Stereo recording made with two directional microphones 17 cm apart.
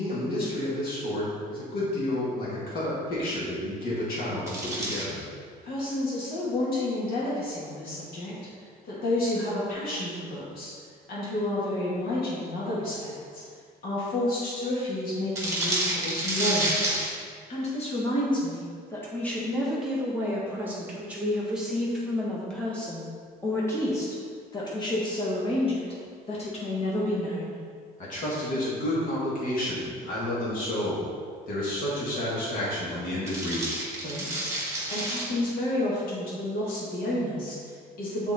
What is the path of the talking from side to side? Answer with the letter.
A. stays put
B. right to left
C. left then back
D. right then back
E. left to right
D.